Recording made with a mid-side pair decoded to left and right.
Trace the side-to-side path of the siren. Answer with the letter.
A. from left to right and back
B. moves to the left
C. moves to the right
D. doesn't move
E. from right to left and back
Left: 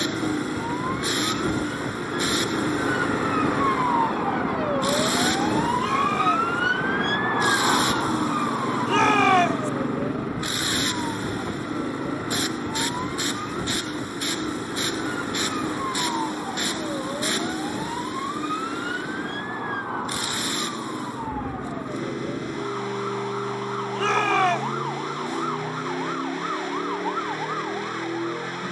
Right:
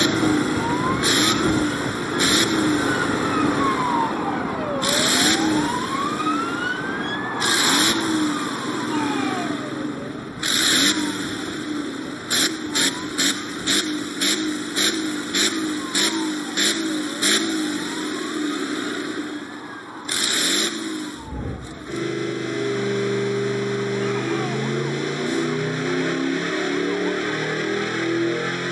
B.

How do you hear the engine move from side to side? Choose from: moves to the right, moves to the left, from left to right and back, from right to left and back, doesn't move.
doesn't move.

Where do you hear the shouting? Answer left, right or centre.
left.